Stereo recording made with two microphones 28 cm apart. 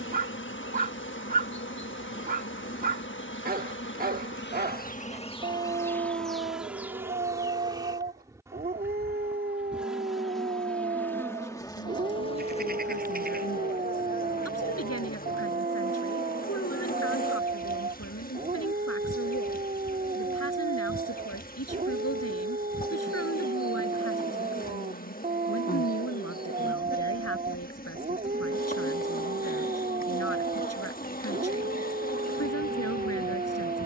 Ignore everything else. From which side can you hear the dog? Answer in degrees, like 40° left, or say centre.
30° right.